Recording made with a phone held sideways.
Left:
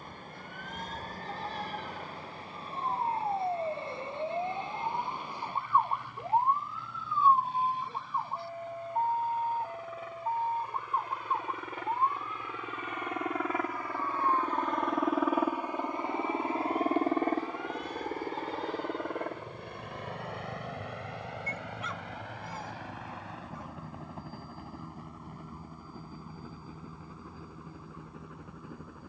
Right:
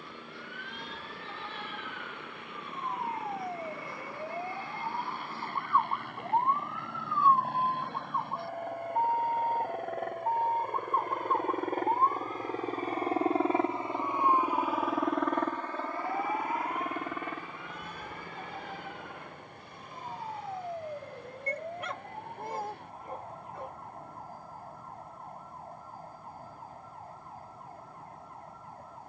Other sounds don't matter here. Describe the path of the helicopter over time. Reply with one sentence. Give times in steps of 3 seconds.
You can hear the helicopter on the right from 0 s and on the left from 15 s.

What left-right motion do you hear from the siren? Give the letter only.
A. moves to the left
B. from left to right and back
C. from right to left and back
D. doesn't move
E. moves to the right
E.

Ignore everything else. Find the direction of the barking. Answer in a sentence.
You can hear the barking on the right.